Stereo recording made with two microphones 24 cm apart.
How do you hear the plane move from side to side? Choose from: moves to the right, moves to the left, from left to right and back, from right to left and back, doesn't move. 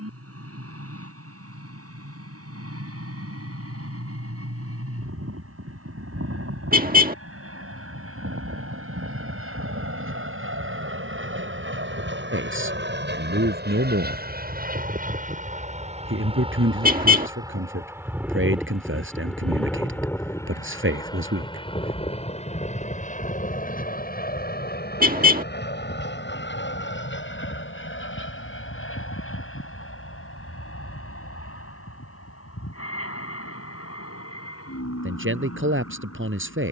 moves to the left.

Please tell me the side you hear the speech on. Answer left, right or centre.
right.